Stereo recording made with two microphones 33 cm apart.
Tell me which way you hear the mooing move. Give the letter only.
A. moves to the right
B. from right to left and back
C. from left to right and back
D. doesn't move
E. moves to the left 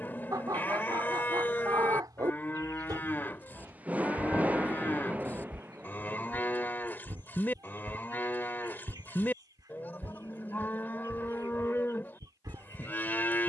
D.